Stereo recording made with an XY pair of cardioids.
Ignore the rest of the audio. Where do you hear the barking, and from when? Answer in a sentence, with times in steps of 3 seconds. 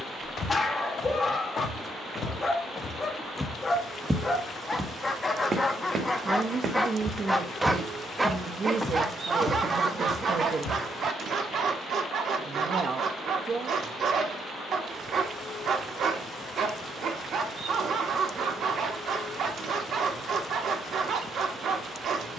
In this clip you hear the barking on the left from 0 s, in the centre from 6 s and on the right from 9 s.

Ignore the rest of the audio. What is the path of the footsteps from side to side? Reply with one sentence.
In this clip you hear the footsteps go right and come back.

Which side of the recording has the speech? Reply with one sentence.
You can hear the speech on the right.